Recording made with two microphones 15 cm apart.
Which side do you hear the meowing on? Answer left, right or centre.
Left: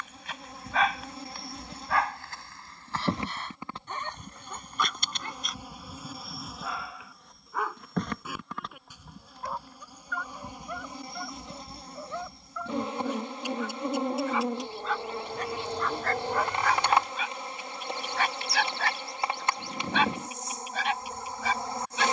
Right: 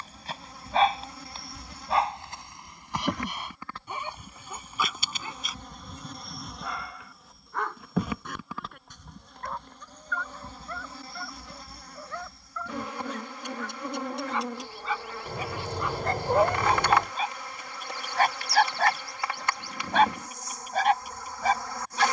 right.